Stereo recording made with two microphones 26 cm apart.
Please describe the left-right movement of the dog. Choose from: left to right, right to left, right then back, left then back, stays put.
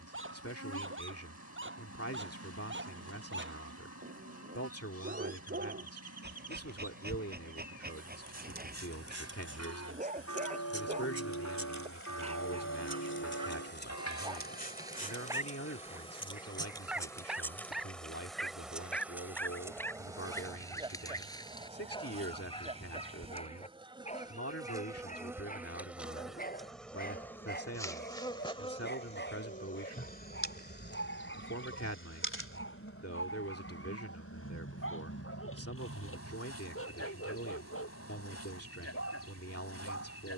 right to left.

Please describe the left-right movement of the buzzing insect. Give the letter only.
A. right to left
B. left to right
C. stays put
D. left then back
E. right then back
E.